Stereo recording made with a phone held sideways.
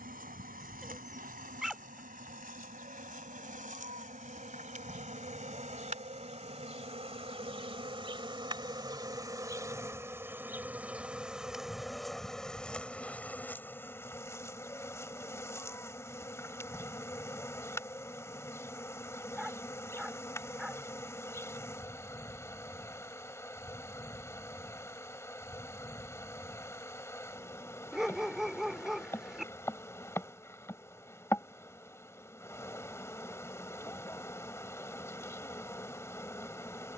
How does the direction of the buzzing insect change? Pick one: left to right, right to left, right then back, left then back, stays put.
right to left.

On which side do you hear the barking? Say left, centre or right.
centre.